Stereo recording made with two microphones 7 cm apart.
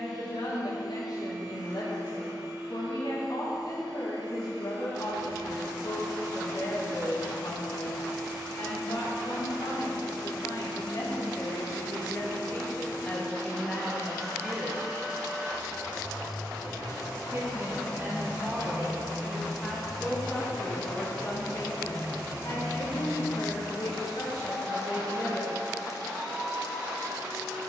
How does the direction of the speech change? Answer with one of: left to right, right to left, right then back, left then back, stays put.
right then back.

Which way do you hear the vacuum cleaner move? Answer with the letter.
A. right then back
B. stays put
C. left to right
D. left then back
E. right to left
B.